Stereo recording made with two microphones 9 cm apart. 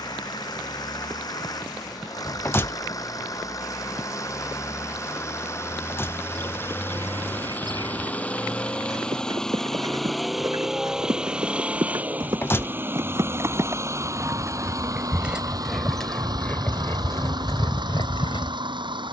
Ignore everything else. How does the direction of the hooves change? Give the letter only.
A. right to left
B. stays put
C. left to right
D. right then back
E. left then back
A.